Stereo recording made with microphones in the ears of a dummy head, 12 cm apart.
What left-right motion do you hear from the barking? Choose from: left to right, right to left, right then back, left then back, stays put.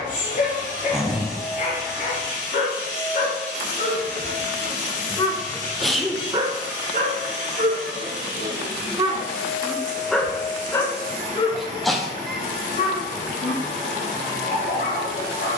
right then back.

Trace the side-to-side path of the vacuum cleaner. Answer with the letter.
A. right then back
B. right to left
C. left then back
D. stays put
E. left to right
D.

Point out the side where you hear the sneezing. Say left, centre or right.
centre.